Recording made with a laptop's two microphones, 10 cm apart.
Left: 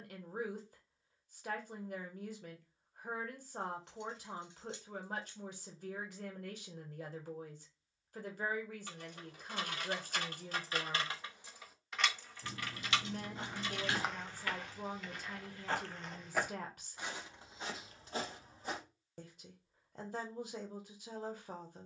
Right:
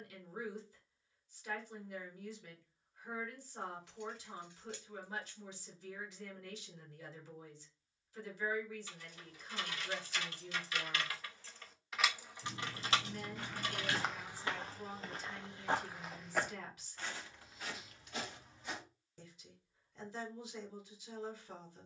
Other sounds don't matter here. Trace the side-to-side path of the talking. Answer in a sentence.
In this clip you hear the talking stay in one place.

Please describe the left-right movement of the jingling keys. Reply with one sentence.
You can hear the jingling keys travel towards the right.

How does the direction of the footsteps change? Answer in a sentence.
You can hear the footsteps move from left to right and back again.